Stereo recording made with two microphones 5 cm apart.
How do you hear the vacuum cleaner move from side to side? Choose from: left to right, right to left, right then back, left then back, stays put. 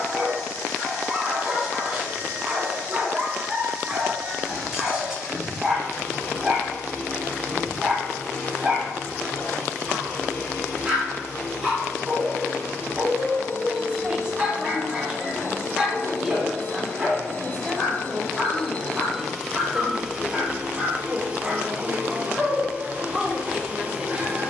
left to right.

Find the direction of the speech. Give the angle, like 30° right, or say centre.
20° right.